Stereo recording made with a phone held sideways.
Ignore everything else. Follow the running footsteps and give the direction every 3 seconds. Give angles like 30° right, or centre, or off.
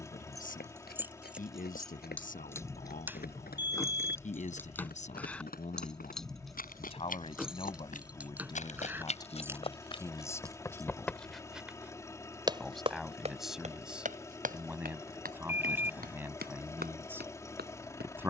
70° left, 70° left, 60° left, 20° left, 40° right, 70° right.